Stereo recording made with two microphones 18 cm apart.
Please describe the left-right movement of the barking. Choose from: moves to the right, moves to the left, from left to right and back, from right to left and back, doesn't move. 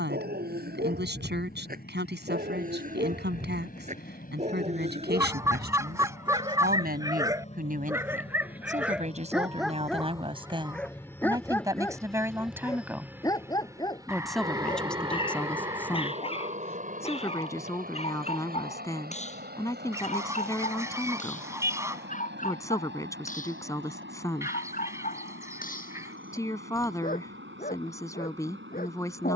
moves to the left.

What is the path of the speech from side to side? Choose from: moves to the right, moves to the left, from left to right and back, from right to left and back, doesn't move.
moves to the left.